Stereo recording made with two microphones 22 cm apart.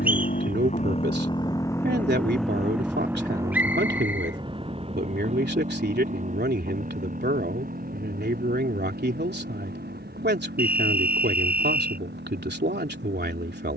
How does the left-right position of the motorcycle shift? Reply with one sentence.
In this clip you hear the motorcycle travel towards the right.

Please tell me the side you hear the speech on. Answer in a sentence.
In this clip you hear the speech on the right.